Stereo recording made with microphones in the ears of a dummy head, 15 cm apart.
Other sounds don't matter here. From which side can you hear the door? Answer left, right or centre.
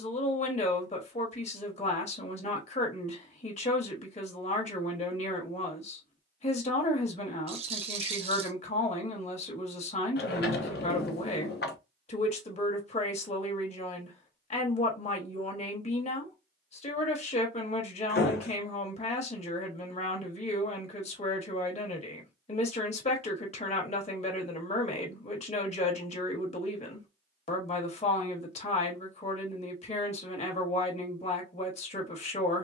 left.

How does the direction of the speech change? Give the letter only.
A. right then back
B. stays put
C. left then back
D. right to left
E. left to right
B.